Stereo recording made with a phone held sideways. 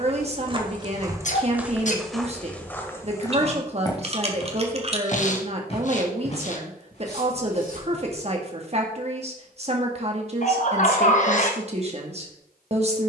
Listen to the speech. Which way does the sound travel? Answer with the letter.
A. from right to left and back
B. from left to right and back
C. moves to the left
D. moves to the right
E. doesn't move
E.